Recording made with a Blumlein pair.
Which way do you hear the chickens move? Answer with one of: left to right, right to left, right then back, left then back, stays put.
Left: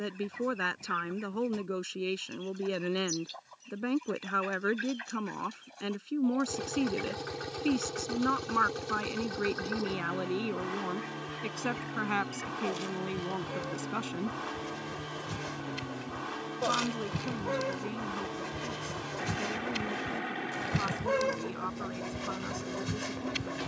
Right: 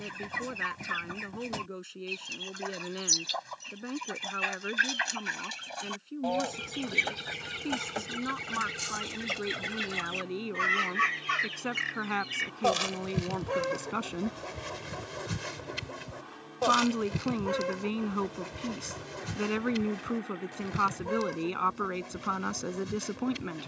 right to left.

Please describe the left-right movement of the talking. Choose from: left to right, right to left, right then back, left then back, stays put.
left to right.